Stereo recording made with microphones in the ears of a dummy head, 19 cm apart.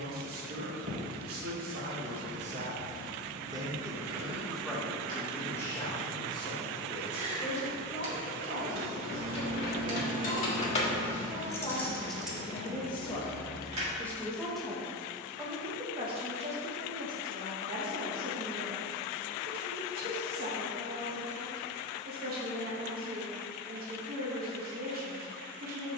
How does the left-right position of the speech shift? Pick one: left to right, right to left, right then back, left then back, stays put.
left then back.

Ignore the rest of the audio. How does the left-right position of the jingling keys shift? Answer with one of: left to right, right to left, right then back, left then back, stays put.
left to right.